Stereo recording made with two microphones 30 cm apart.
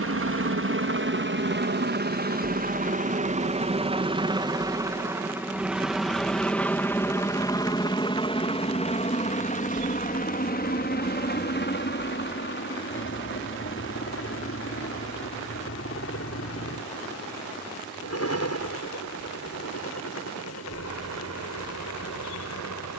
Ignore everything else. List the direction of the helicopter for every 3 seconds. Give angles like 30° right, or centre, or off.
40° right, 10° right, 10° left, 30° left, 40° left, 50° left, 50° left, 60° left.